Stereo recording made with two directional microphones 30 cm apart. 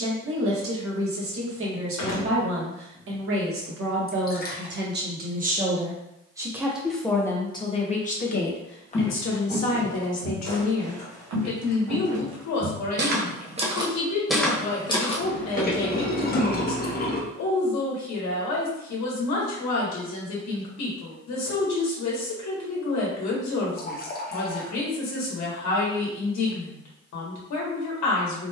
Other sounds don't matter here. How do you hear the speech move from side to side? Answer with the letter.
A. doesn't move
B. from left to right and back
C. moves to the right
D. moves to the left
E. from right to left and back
D.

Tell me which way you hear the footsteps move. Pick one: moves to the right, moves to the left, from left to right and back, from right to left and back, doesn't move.
from left to right and back.